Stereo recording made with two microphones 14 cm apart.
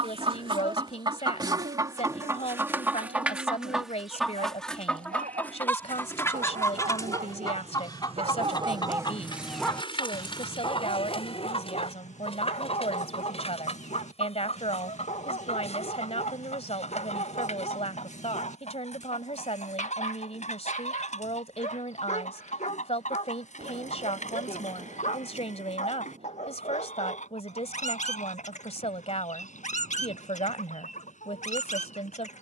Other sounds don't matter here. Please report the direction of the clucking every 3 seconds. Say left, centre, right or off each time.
right, centre, left, left, left, left, left, left, left, left, left.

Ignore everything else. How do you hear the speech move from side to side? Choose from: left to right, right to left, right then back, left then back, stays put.
stays put.